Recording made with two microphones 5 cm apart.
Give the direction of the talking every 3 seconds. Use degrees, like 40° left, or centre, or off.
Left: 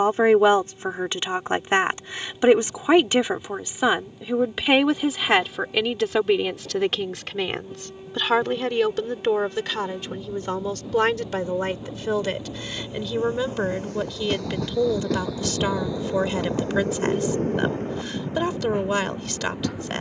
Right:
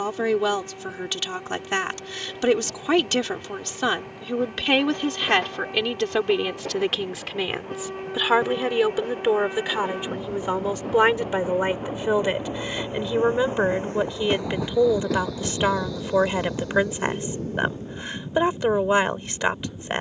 30° left, 10° left, centre, 10° right, 20° right, 20° right, 20° right.